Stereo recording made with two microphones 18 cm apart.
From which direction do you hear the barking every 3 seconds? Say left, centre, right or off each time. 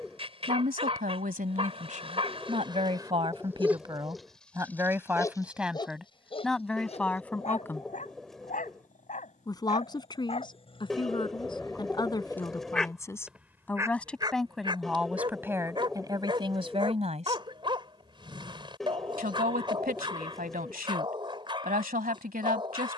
right, centre, left, left, centre, right, right, right.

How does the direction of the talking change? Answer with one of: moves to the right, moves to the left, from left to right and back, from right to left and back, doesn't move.
from right to left and back.